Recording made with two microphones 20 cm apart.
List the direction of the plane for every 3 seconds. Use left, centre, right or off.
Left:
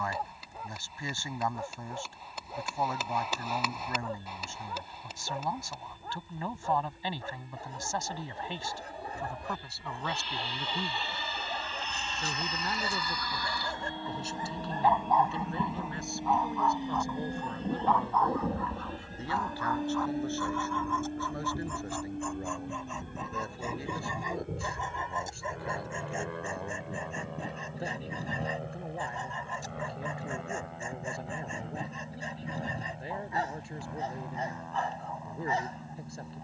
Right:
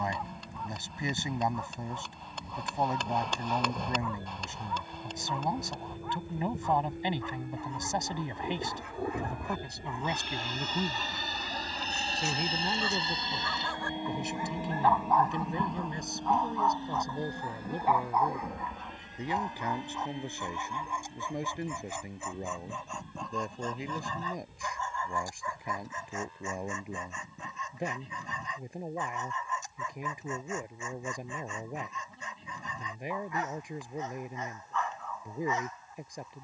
right, right, right, right, right, centre, left, left, left, left, left, left.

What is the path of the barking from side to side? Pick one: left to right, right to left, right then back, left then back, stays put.
right then back.